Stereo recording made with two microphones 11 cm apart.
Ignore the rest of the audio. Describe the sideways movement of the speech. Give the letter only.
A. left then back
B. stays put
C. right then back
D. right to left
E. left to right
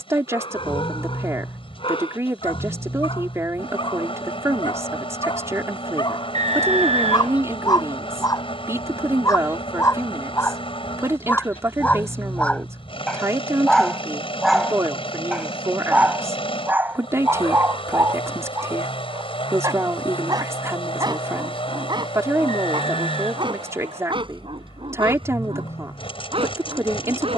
B.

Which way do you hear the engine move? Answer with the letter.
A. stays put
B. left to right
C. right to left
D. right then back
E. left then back
A.